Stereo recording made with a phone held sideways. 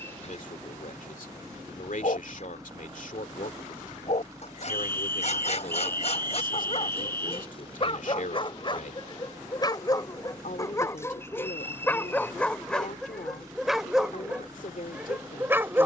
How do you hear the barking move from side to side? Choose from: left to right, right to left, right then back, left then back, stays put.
left to right.